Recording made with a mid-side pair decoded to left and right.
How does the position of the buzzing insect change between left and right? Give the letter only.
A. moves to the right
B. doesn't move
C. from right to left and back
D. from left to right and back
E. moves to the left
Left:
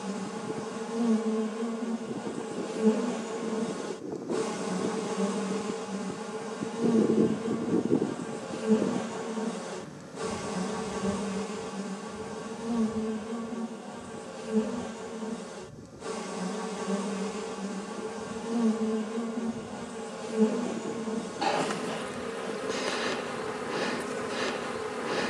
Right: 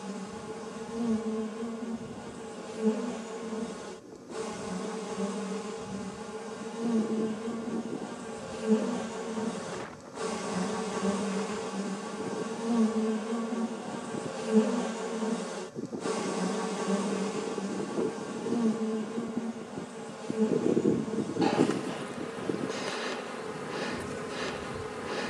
D.